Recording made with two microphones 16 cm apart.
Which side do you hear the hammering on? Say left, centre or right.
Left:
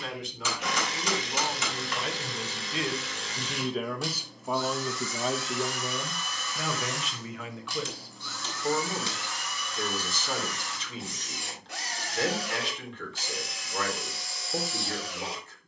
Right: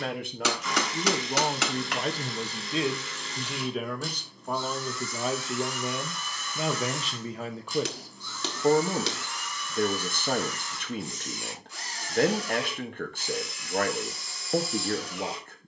right.